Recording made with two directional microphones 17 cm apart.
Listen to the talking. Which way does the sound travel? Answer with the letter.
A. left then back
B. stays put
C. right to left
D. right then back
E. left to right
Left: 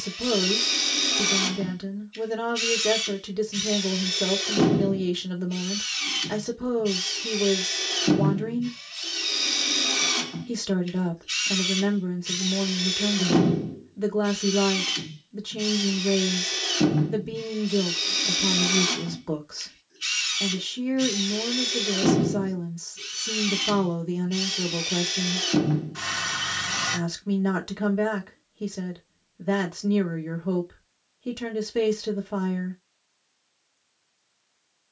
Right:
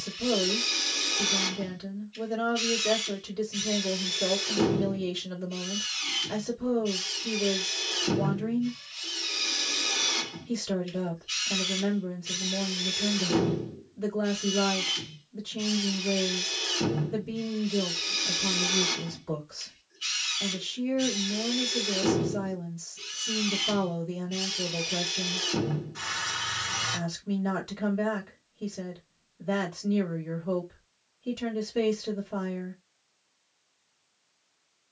B.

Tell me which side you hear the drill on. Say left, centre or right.
left.